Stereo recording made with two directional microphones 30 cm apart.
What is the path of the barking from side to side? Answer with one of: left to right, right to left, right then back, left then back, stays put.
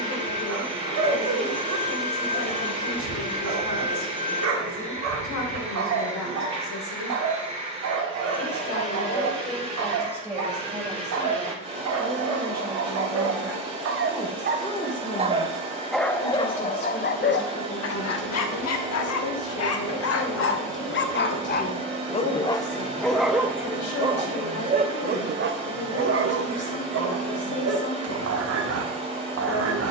left then back.